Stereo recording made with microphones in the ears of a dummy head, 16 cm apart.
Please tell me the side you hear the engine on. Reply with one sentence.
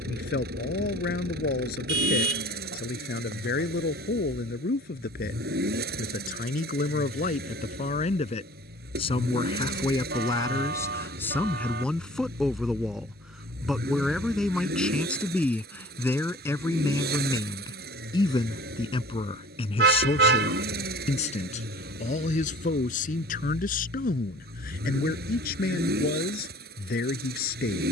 In this clip you hear the engine on the right.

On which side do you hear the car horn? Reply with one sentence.
You can hear the car horn on the right.